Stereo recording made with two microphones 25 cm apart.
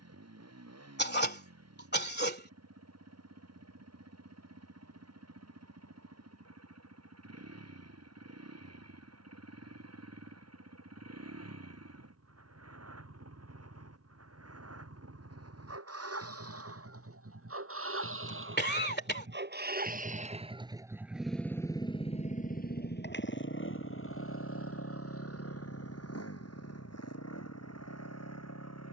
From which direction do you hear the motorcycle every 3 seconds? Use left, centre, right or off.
right, right, right, right, right, right, right, left, left, left.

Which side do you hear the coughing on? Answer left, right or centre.
left.